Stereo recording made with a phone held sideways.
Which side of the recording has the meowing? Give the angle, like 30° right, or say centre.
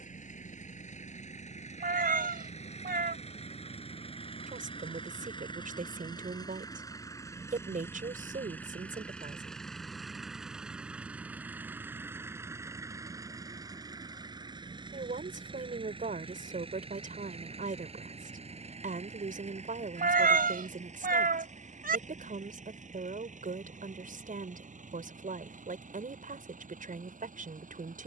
80° right.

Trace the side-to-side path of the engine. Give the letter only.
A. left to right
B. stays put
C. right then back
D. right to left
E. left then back
A.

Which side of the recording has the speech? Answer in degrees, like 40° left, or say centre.
60° right.